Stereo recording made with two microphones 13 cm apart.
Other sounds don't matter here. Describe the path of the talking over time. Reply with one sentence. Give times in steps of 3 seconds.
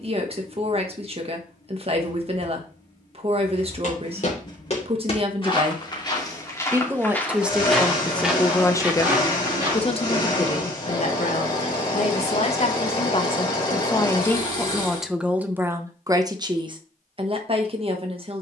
In this clip you hear the talking on the right from 0 s, in the centre from 6 s, on the left from 9 s and on the right from 15 s.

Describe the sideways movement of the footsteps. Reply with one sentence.
In this clip you hear the footsteps move to the right.